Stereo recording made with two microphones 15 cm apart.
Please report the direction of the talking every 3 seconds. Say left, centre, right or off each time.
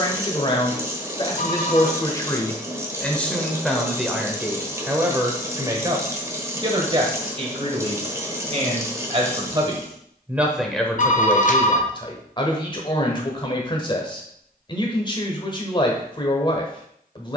left, centre, right, centre, left, left.